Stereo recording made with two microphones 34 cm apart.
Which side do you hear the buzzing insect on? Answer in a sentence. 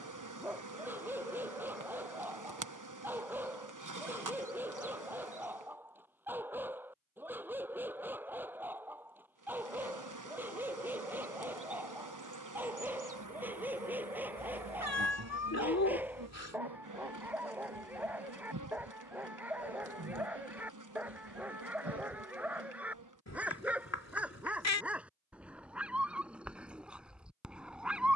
You can hear the buzzing insect on the right.